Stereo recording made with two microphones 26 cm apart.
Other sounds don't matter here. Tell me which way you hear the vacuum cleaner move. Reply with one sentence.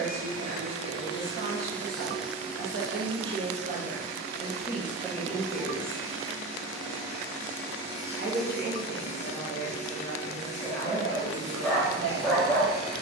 In this clip you hear the vacuum cleaner move from left to right and back again.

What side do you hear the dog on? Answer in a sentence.
You can hear the dog in the centre.